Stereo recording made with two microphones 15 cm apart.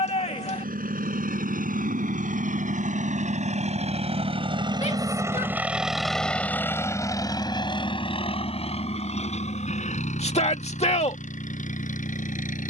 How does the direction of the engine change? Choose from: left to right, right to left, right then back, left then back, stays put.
right to left.